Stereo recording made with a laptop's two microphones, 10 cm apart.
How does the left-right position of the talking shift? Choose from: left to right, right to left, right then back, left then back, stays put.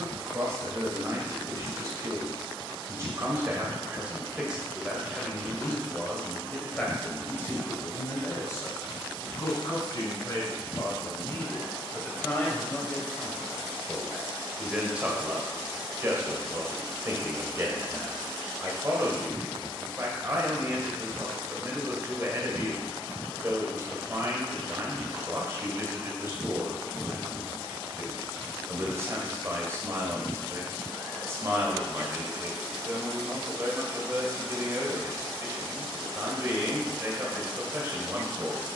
left then back.